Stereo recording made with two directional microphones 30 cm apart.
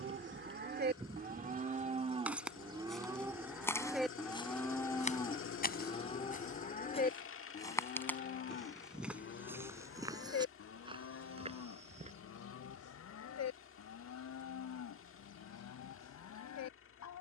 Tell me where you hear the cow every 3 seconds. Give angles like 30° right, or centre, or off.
30° right, centre, 30° left, 50° left, 60° left, 60° left.